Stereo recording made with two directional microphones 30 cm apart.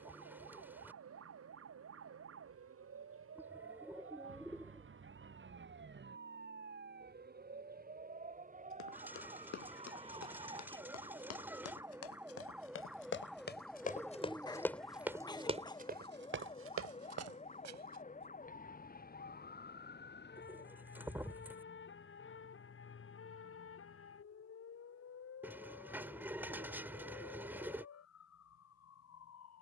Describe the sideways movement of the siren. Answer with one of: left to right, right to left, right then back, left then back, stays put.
right to left.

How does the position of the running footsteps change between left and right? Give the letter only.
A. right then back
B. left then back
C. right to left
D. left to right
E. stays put
D.